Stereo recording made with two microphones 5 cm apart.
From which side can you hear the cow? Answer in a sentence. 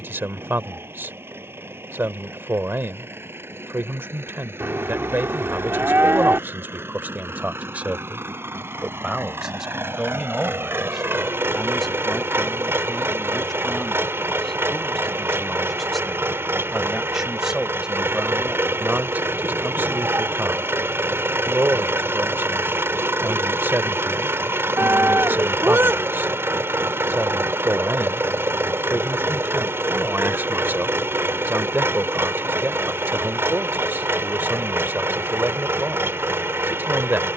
In this clip you hear the cow on the right.